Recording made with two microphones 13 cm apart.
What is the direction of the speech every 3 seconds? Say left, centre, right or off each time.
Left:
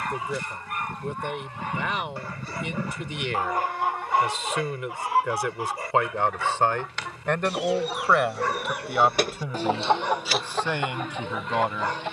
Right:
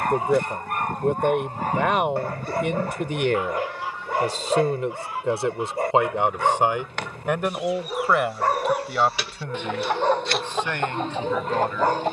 right, right, centre, centre.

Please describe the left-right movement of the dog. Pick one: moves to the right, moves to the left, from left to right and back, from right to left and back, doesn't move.
doesn't move.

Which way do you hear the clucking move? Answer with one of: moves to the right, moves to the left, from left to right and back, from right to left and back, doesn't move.
from right to left and back.